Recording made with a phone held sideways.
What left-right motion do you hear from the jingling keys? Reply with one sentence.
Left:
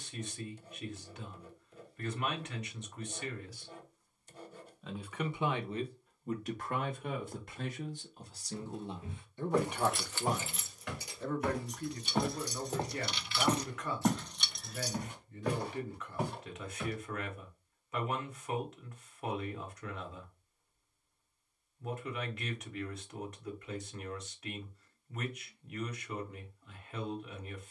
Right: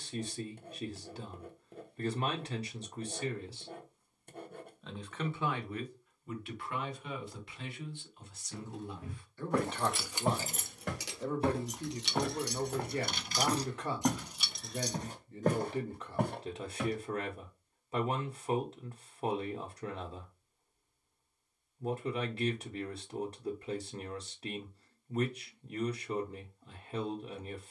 You can hear the jingling keys go right and come back.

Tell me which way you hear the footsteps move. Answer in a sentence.
You can hear the footsteps move from right to left and back again.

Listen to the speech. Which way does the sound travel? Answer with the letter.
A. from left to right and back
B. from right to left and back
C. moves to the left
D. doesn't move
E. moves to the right
B.